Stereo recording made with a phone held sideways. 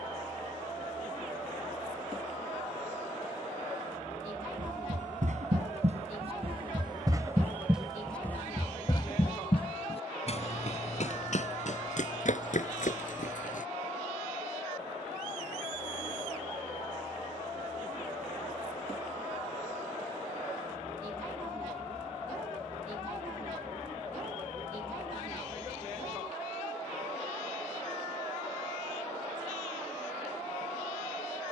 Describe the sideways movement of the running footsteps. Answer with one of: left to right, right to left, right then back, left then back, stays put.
right to left.